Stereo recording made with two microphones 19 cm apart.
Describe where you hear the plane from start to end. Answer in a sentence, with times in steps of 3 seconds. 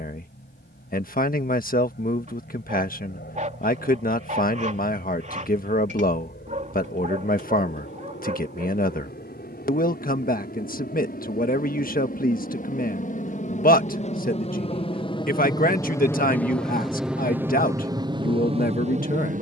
You can hear the plane on the left from 0 s, in the centre from 15 s and on the right from 18 s.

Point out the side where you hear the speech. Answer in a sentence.
In this clip you hear the speech on the left.